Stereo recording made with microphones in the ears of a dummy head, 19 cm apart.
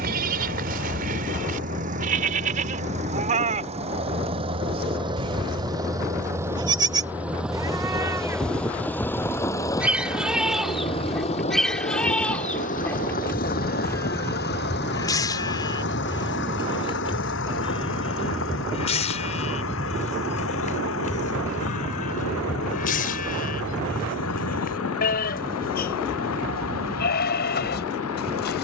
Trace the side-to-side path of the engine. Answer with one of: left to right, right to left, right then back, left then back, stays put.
right to left.